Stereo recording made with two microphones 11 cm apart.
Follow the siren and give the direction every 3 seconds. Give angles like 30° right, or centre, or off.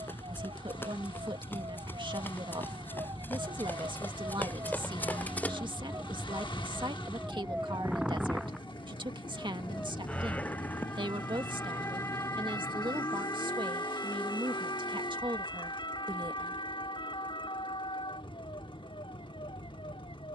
50° right, 30° right, 10° right, 20° left, 30° left, 50° left, 50° left.